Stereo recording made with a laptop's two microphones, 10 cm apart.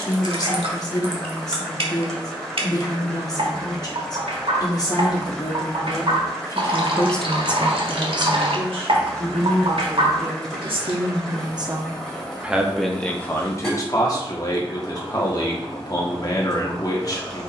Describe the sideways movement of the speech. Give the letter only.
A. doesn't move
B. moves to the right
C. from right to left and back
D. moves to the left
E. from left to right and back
E.